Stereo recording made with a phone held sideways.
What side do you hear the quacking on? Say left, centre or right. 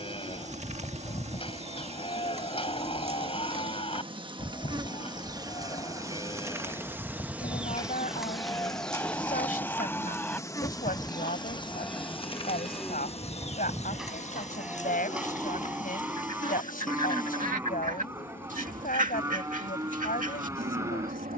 right.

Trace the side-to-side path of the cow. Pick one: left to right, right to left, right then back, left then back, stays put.
left to right.